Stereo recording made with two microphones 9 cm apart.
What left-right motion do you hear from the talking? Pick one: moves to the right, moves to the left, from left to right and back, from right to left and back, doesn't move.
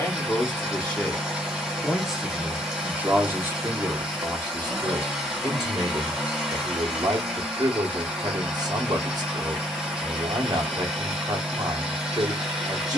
moves to the right.